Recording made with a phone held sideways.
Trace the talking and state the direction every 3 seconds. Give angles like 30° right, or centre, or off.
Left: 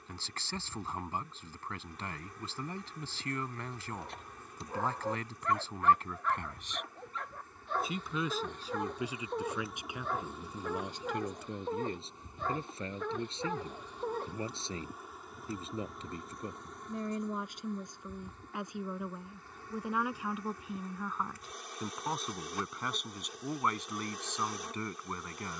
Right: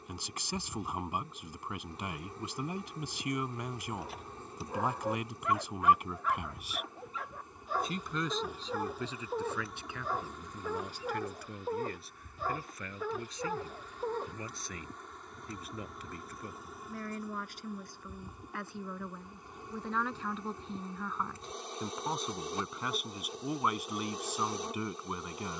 10° right, 10° right, centre, 20° left, 30° left, 20° left, 10° left, centre, 10° right.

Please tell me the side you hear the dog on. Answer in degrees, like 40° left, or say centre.
10° right.